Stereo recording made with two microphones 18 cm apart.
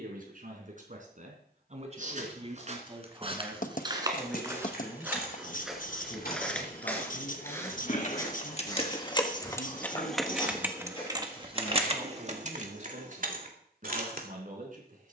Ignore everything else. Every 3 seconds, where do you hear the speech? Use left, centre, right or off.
right, centre, left, left, right.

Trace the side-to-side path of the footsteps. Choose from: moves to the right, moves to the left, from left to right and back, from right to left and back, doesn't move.
moves to the left.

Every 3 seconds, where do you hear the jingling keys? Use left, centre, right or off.
off, left, left, centre, right.